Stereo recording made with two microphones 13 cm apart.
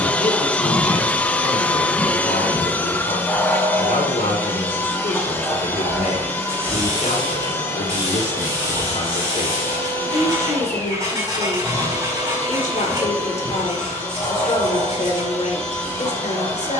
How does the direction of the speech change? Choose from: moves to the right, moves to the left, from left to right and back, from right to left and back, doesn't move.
doesn't move.